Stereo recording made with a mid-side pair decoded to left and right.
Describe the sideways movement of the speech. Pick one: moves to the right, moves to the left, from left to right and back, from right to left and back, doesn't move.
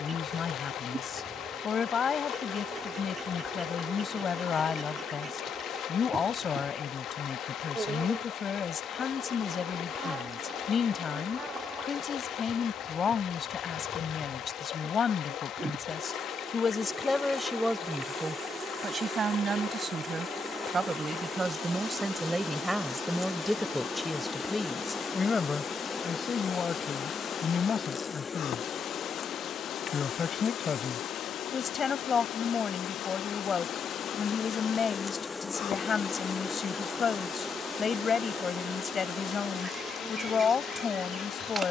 from left to right and back.